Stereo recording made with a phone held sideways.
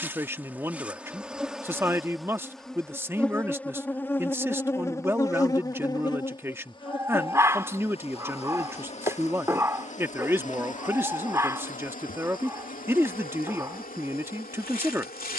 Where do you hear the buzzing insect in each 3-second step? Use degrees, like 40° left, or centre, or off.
centre, 20° left, 40° left, 50° left, 60° left.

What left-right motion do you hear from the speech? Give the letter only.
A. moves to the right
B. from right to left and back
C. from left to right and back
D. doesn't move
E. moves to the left
D.